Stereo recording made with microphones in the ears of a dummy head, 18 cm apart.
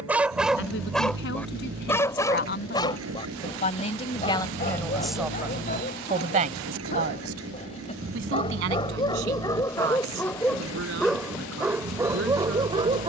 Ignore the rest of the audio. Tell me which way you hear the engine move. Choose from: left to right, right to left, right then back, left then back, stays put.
stays put.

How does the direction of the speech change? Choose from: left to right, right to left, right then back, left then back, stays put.
left to right.